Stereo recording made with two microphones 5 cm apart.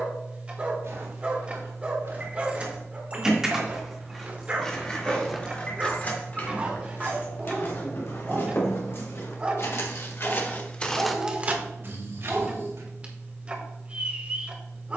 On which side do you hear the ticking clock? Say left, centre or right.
right.